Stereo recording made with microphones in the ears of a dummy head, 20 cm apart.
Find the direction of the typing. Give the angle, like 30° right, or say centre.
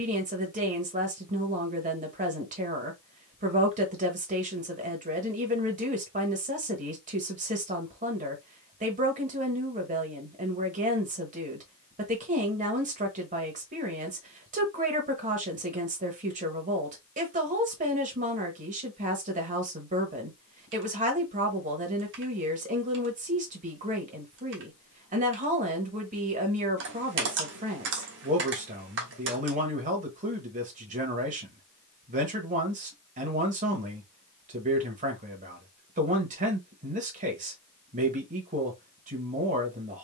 60° right.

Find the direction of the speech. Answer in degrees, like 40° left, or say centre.
40° right.